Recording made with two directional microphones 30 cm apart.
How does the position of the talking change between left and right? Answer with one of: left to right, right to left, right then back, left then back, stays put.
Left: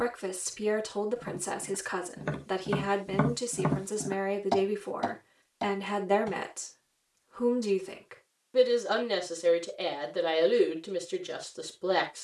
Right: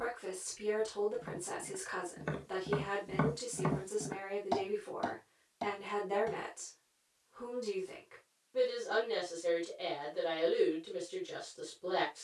stays put.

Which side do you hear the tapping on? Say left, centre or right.
left.